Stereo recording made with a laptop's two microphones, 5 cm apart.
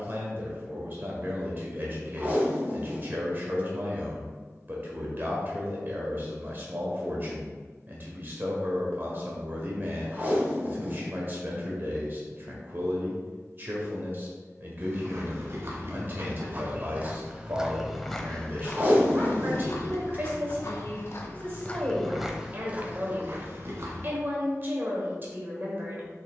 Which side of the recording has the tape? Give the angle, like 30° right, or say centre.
30° right.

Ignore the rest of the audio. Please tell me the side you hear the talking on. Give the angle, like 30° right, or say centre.
40° right.